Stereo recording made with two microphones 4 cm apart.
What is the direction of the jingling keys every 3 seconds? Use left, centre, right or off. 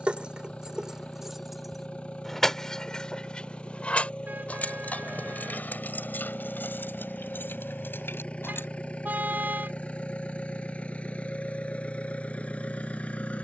centre, left, left, off, off.